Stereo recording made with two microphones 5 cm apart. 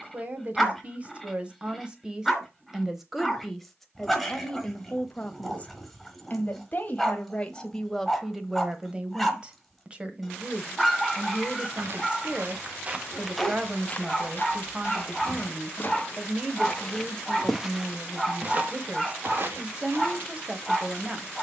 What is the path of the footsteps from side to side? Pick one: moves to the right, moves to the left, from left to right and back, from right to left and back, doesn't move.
from right to left and back.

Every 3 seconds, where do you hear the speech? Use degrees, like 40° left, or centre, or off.
20° right, 10° left, 10° left, 20° right, 20° right, 20° right, 20° right.